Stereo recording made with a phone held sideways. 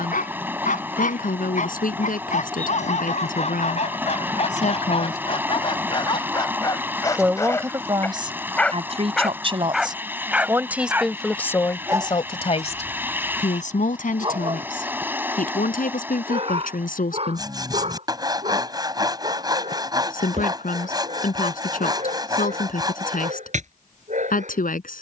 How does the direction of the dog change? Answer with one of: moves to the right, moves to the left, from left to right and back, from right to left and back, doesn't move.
moves to the right.